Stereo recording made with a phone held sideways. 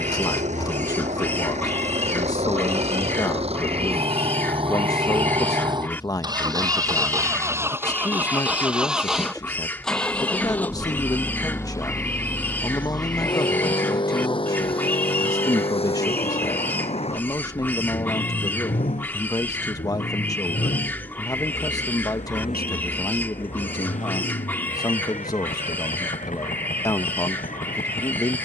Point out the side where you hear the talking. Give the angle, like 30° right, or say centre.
30° left.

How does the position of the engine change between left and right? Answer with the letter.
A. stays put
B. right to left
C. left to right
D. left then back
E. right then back
B.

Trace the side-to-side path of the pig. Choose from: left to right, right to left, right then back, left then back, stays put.
stays put.